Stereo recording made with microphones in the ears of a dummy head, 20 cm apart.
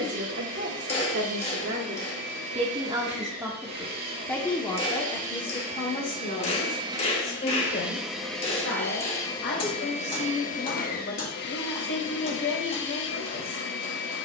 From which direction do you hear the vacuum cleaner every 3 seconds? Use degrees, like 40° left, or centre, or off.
50° right, 40° right, 10° right, 30° left, 50° left.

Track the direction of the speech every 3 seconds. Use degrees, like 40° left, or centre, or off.
40° right, 10° left, 40° left, 50° left, 50° left.